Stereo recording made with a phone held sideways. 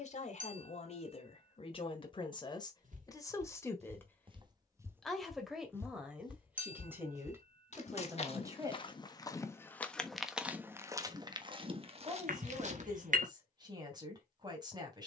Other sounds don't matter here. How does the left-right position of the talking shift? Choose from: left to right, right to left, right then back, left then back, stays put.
left to right.